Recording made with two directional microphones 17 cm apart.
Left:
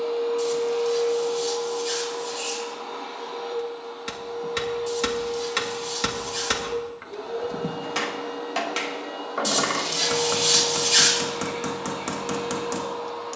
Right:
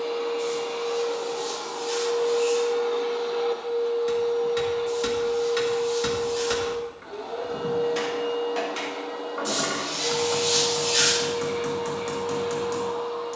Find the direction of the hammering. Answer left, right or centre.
left.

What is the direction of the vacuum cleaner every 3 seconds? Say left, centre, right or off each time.
right, centre, centre, left, left.